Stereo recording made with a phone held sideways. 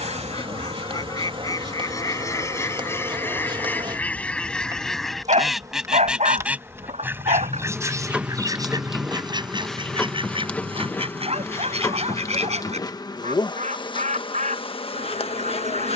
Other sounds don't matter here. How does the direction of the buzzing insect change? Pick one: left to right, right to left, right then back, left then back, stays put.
right to left.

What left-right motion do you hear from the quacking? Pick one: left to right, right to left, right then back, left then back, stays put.
left to right.